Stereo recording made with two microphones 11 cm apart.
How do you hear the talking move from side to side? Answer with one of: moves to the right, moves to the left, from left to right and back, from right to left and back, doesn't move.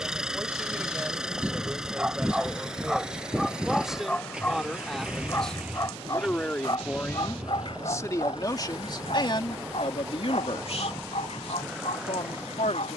moves to the left.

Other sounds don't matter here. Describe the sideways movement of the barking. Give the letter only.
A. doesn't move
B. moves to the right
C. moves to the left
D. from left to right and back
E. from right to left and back
C.